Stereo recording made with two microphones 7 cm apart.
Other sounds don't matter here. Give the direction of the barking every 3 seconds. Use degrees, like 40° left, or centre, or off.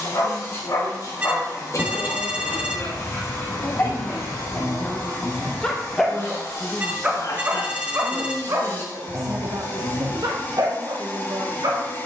50° left, 20° left, 20° right, 60° right.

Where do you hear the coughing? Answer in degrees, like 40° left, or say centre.
50° left.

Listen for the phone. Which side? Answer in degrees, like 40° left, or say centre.
20° right.